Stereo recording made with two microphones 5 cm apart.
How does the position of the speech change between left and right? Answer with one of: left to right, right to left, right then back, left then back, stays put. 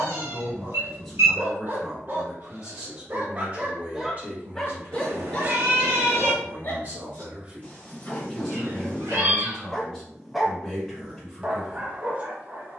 right then back.